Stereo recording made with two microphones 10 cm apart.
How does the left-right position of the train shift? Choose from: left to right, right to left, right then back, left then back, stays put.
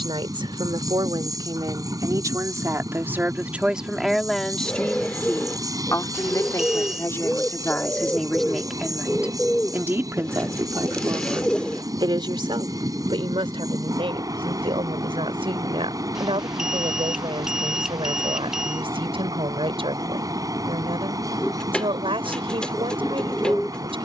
stays put.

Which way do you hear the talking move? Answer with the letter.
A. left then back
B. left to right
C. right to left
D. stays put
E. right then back
A.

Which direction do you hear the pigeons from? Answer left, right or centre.
centre.